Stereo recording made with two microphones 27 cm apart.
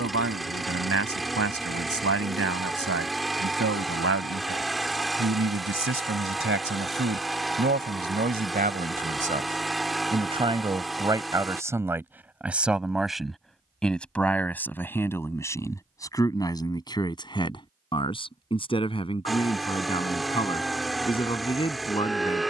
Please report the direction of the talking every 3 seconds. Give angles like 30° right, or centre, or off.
70° right, 60° right, 40° right, 20° right, centre, 10° left, 20° left, 20° left.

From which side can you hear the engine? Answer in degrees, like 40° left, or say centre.
centre.